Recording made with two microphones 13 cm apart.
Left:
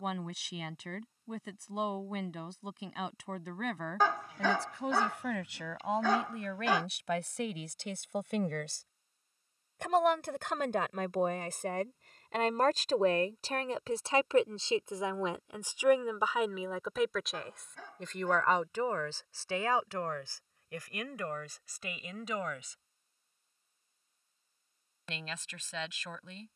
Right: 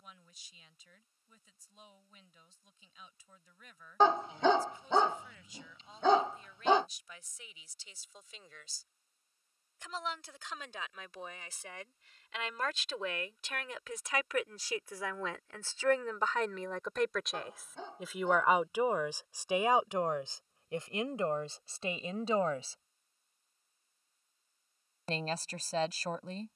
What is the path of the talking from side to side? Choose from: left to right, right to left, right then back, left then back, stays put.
left to right.